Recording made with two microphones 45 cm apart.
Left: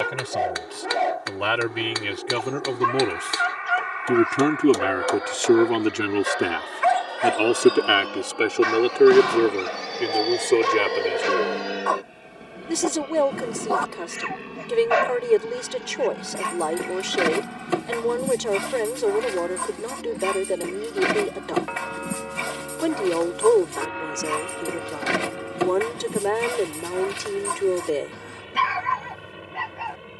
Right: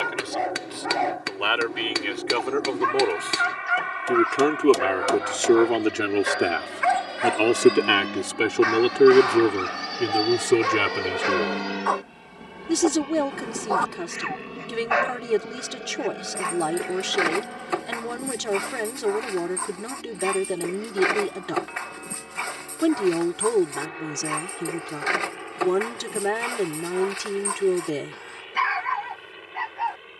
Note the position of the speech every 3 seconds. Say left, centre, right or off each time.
left, left, centre, right, right, right, right, right, right, right.